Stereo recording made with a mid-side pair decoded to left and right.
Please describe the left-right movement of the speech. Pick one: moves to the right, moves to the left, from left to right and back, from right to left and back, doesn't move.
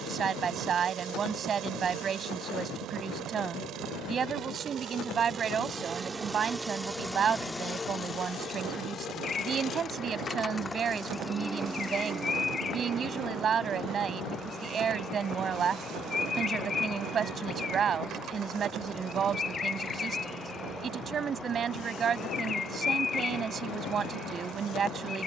doesn't move.